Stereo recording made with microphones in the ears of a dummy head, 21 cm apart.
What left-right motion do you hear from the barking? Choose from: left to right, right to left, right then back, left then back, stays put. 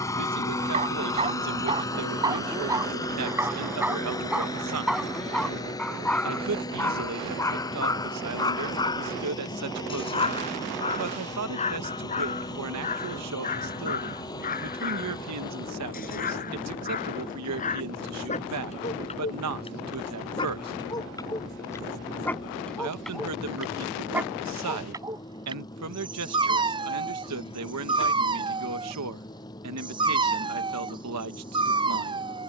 left then back.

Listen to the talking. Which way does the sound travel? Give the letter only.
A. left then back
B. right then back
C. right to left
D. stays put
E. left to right
D.